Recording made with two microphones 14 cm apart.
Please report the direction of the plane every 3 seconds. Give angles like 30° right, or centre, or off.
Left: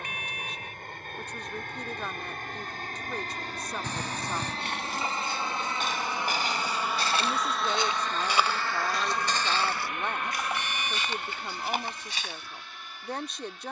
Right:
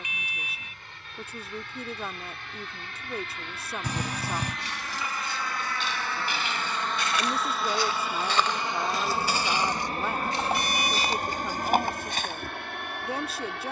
50° left, 40° left, centre, 40° right, 60° right.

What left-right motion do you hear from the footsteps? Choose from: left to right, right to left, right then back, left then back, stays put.
left to right.